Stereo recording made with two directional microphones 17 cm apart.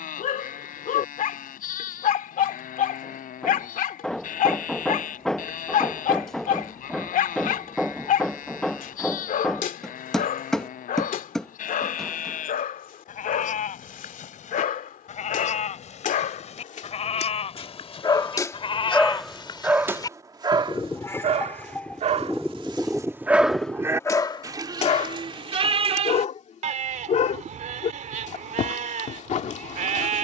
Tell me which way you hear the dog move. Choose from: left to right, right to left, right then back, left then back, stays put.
right then back.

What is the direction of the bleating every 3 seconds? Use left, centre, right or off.
left, left, left, left, left, left, left, centre, right, right.